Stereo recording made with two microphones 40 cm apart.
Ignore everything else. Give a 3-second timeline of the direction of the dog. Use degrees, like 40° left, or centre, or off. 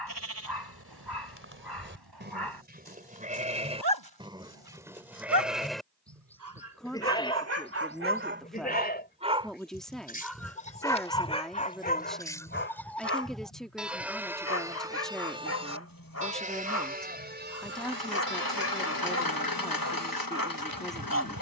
70° right, 60° right, 30° right, 10° left, 30° left, 40° left, 40° left.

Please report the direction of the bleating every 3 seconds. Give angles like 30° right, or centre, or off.
30° right, 10° right, 10° left, 20° left, centre, 20° right, 40° right.